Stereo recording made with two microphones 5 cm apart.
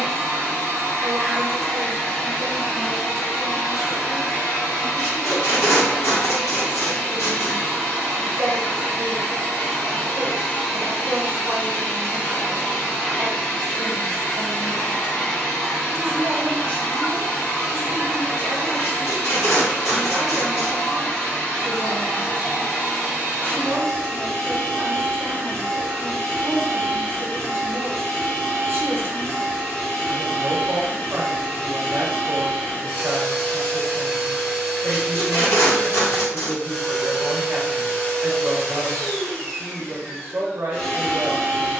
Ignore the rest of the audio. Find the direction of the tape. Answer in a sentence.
You can hear the tape on the left.